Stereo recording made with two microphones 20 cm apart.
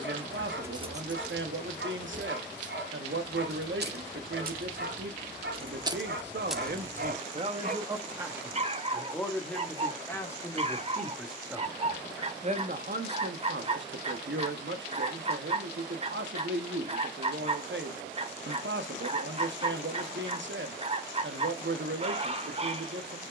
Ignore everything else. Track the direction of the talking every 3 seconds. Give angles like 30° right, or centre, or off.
70° right, 70° right, 40° right, 10° left, 60° right, 70° right, 70° right, 70° right.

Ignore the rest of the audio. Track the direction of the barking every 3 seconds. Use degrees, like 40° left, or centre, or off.
70° right, 70° right, 50° right, 30° right, 30° right, 30° right, 30° right, 30° right.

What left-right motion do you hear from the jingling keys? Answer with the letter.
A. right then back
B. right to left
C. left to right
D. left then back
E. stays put
A.